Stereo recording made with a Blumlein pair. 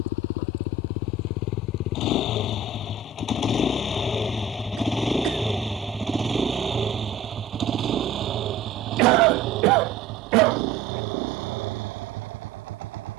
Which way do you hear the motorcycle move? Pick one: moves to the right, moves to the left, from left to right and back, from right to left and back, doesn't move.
moves to the right.